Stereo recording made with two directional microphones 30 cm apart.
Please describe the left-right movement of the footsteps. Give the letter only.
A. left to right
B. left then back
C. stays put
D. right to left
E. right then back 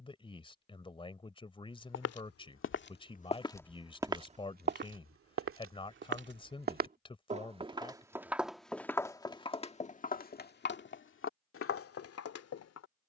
E.